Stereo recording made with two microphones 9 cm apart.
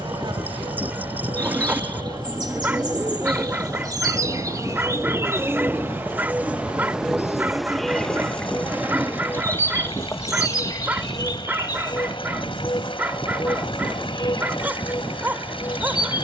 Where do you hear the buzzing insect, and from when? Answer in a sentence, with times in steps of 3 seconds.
You can hear the buzzing insect on the right from 0 s, in the centre from 6 s and on the left from 9 s.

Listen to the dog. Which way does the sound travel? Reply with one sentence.
You can hear the dog stay in one place.